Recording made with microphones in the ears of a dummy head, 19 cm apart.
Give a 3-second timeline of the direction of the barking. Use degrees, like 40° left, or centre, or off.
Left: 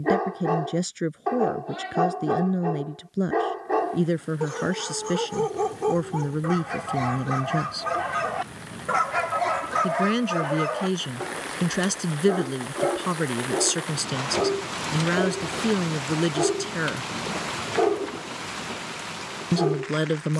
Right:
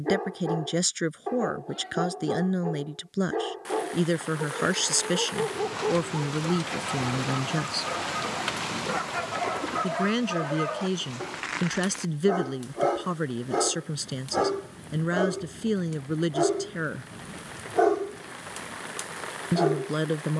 40° left, 40° left, 40° left, 20° left, 30° right, 70° right, 70° right.